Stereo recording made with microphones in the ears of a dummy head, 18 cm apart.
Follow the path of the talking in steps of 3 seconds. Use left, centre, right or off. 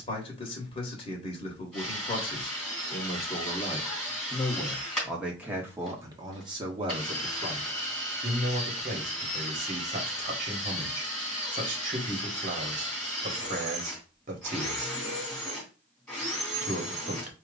left, centre, right, right, right, right.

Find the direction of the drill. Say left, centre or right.
centre.